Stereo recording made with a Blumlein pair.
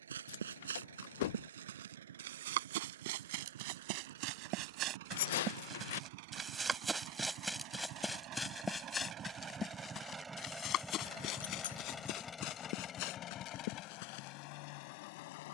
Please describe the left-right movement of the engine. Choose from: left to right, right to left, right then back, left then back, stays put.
right to left.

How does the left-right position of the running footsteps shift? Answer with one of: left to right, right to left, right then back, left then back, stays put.
right to left.